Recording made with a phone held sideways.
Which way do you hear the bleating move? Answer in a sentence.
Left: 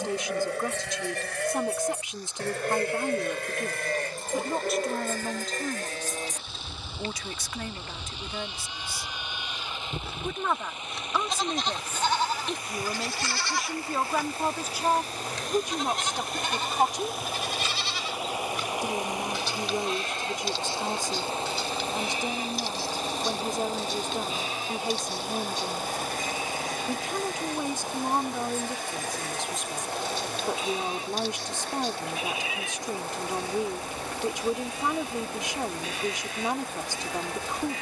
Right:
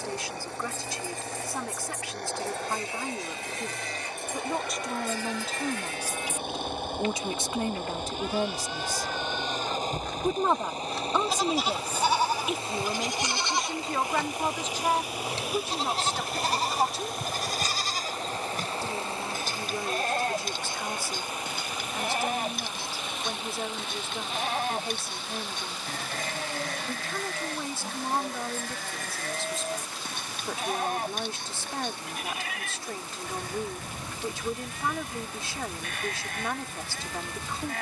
In this clip you hear the bleating go from the left side to the right.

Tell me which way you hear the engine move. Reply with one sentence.
You can hear the engine go from the right side to the left.